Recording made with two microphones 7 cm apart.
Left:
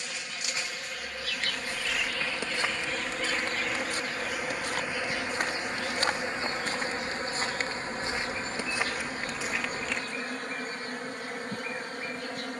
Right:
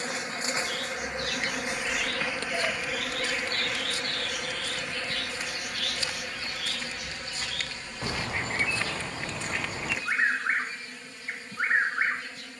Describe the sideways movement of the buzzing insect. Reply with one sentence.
In this clip you hear the buzzing insect move from right to left.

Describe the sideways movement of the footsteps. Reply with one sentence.
In this clip you hear the footsteps go left and come back.